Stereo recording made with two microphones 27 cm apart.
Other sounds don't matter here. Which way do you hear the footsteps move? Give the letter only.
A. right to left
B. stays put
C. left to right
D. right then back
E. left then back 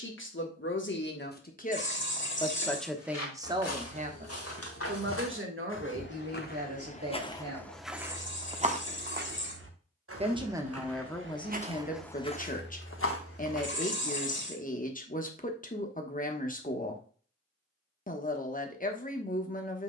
D.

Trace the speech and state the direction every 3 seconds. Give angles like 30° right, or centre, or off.
30° left, 30° right, 60° right, 10° left, 30° left, 30° left, 30° left.